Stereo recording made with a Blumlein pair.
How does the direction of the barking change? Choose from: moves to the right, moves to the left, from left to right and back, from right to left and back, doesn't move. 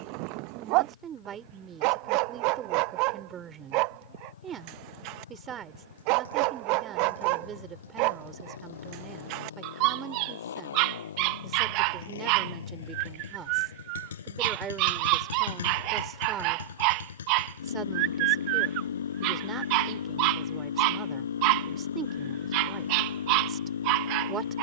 doesn't move.